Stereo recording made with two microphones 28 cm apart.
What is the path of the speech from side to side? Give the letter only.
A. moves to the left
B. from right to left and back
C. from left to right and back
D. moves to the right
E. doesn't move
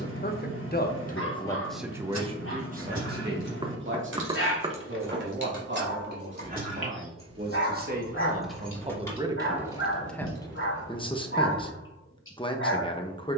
C.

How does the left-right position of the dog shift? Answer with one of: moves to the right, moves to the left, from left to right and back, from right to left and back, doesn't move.
doesn't move.